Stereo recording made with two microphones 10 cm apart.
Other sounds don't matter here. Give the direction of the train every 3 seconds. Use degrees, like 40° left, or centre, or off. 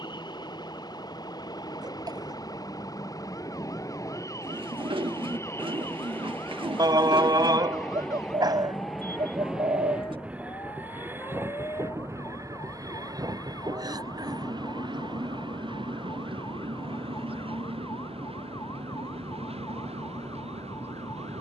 40° left, 30° left, 10° left, 10° right, 40° right, 50° right, 60° right.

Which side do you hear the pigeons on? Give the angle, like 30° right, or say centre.
50° right.